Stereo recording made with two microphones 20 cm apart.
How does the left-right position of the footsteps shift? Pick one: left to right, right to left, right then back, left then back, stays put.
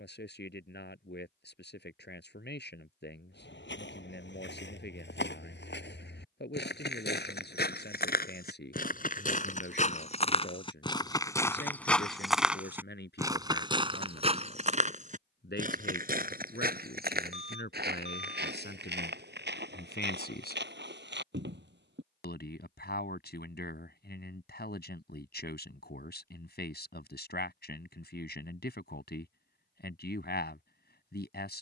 left to right.